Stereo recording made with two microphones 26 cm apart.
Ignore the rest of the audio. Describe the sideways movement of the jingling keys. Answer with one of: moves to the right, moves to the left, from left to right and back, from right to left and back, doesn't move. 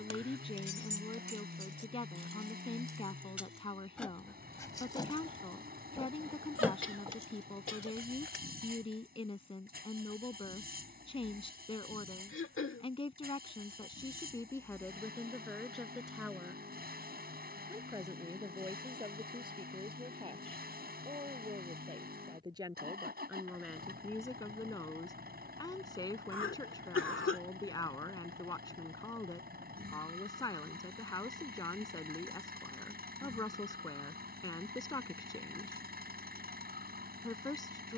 from right to left and back.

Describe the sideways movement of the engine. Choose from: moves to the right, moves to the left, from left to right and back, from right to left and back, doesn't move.
doesn't move.